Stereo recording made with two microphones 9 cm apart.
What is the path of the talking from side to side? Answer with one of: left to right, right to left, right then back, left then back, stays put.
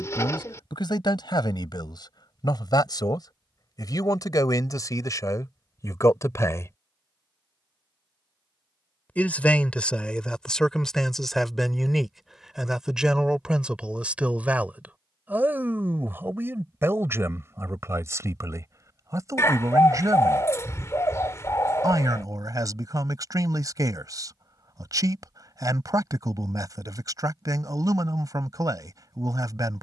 left to right.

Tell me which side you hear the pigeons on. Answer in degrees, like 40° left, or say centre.
30° left.